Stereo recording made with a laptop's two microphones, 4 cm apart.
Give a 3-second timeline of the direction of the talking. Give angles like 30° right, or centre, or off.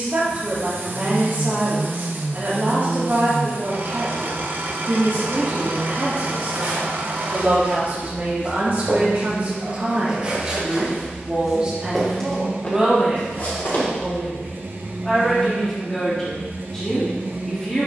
50° right, 50° right, 50° right, 30° right, 10° right, 10° left.